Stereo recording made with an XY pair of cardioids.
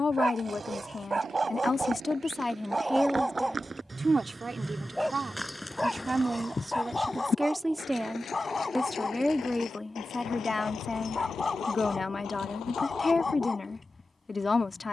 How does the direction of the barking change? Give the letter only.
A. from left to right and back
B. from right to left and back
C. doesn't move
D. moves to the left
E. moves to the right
D.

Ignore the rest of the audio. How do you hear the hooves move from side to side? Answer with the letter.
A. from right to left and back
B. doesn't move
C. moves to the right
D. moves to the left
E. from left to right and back
D.